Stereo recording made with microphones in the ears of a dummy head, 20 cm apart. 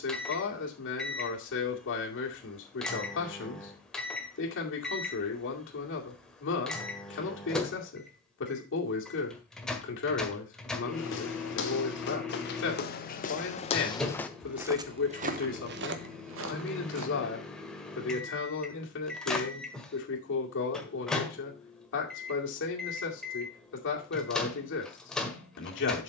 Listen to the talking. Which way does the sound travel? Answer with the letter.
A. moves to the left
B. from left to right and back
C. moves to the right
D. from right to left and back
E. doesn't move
E.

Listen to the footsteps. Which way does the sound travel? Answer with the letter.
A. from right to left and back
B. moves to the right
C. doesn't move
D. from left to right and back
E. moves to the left
B.